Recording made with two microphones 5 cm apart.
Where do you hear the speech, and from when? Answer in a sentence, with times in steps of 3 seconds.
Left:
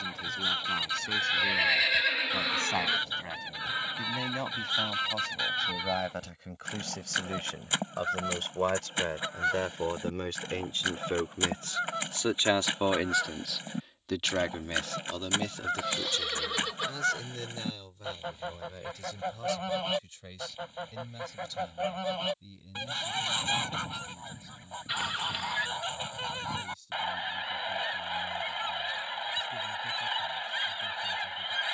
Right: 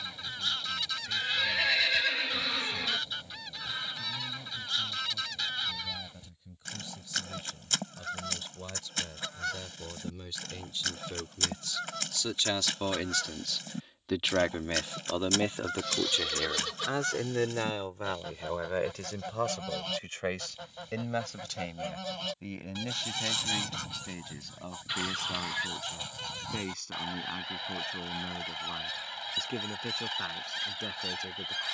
In this clip you hear the speech on the left from 0 s, in the centre from 12 s and on the right from 15 s.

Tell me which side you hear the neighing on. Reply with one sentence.
In this clip you hear the neighing in the centre.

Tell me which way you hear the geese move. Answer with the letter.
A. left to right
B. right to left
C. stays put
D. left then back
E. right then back
C.